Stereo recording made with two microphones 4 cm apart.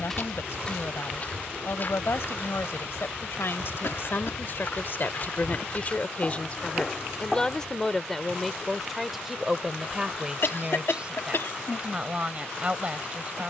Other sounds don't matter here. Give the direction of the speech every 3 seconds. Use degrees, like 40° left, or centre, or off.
70° left, 60° left, 10° left, 20° right, 30° right.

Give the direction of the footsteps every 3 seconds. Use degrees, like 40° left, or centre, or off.
40° left, 50° left, centre, off, off.